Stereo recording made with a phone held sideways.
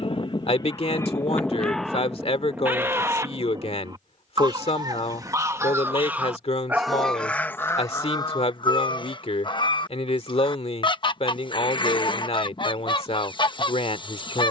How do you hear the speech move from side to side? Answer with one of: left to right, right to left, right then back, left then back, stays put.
stays put.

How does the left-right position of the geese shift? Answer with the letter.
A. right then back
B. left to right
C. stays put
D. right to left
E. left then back
A.